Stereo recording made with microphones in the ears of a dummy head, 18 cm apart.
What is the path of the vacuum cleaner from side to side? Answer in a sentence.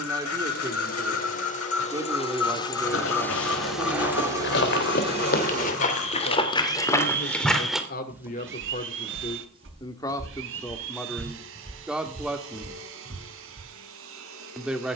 In this clip you hear the vacuum cleaner travel towards the right.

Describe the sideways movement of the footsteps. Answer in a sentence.
In this clip you hear the footsteps move from left to right.